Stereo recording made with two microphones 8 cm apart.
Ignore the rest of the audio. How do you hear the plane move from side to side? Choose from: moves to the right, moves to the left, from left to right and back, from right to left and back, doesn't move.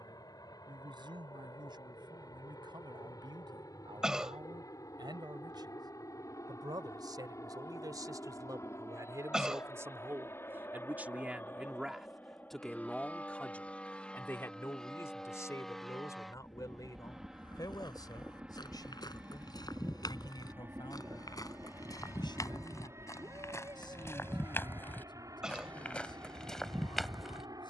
moves to the right.